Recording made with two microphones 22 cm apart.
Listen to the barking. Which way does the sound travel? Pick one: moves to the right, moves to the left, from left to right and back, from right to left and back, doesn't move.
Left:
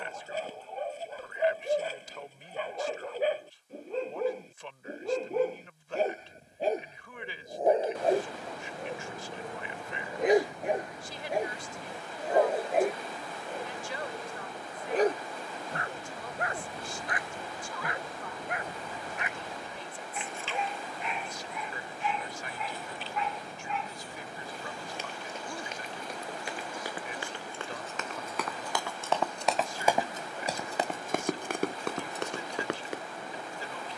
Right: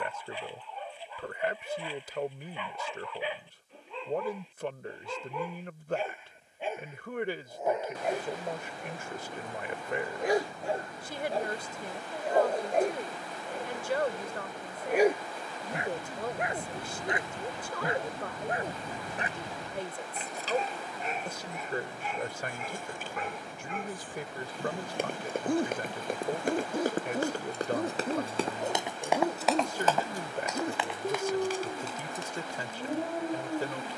moves to the right.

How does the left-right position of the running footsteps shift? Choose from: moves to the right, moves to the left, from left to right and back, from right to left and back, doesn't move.
moves to the left.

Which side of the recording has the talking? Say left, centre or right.
right.